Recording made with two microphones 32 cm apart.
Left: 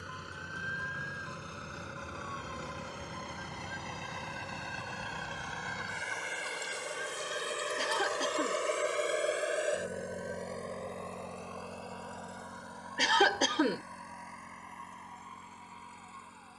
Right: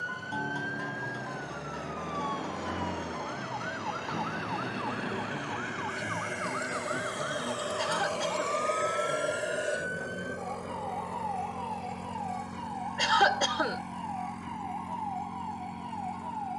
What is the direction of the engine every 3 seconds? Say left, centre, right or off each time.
left, left, left, centre, right, right.